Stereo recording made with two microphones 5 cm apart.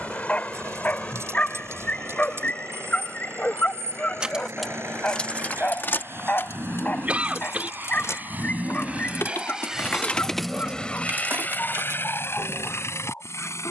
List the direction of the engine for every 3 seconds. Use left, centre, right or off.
right, right, right, centre, left.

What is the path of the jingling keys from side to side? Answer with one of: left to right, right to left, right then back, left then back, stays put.
left then back.